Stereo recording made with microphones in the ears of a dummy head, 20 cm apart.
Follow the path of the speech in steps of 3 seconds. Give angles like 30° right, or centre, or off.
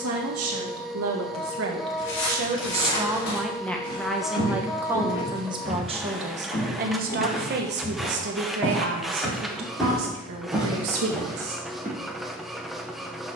60° right, 10° right, 50° right, 70° right, off.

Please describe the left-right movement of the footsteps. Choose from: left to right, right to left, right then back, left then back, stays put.
left to right.